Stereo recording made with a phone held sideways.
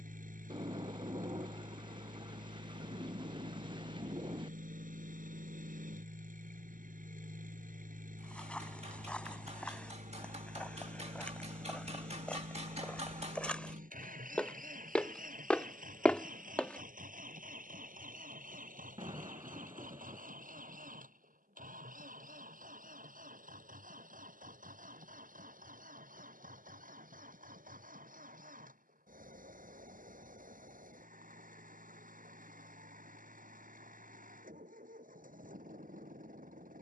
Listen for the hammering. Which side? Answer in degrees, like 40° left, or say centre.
50° right.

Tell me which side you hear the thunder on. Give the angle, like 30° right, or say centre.
40° right.